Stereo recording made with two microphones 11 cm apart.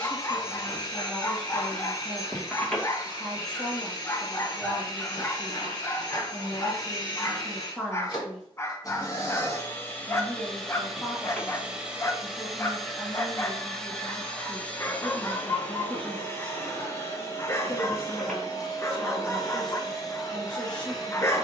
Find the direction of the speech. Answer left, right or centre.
centre.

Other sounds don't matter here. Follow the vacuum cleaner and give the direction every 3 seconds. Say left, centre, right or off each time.
left, left, left, centre, centre, left, left.